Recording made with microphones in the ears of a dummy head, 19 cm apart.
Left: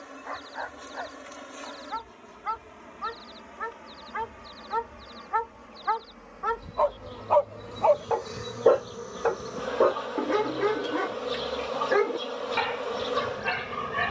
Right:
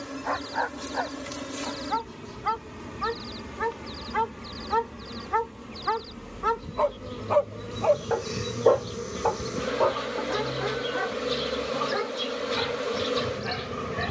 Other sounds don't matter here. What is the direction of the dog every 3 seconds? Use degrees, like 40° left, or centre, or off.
70° right, 60° right, 30° right, 40° left, 70° left.